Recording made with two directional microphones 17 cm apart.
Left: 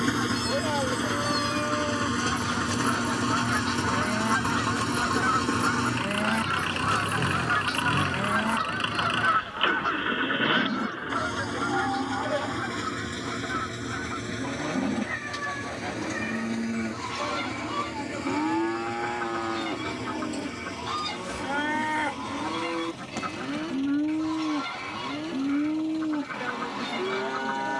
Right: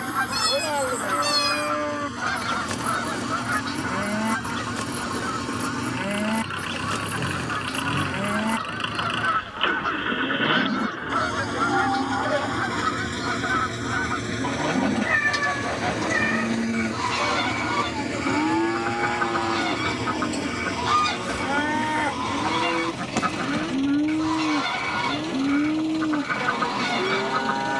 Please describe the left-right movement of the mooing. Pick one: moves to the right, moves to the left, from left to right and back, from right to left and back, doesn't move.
doesn't move.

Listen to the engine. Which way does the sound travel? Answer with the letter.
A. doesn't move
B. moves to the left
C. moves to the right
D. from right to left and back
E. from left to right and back
C.